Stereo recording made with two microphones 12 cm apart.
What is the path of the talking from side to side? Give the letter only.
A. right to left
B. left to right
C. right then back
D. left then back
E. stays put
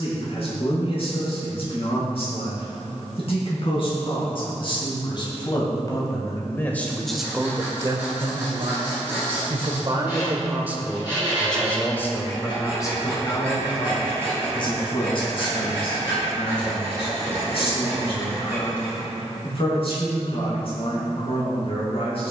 C.